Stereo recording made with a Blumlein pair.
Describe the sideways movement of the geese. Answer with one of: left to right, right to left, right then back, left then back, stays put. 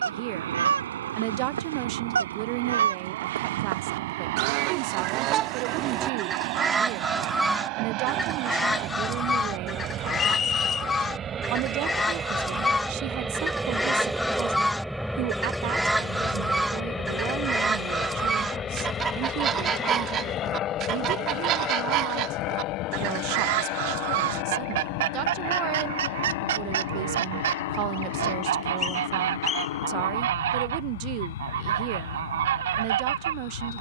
left then back.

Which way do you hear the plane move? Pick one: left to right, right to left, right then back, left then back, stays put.
right to left.